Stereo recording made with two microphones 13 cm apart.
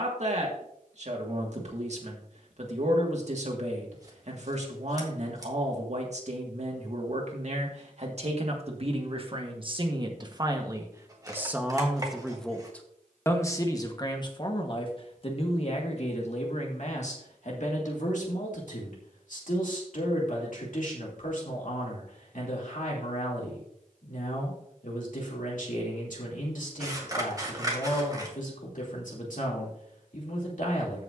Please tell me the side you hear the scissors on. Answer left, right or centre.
right.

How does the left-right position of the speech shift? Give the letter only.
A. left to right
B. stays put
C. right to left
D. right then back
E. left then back
C.